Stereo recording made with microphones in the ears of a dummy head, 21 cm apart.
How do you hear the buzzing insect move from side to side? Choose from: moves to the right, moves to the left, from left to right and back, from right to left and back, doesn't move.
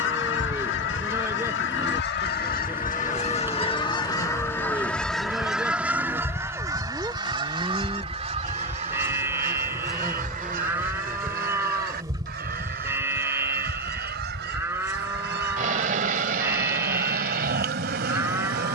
moves to the right.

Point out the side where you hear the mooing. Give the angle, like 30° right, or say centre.
10° right.